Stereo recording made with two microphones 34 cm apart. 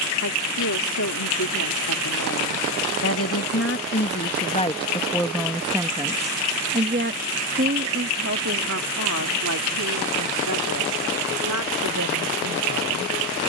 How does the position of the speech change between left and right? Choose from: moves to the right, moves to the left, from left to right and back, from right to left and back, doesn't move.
moves to the right.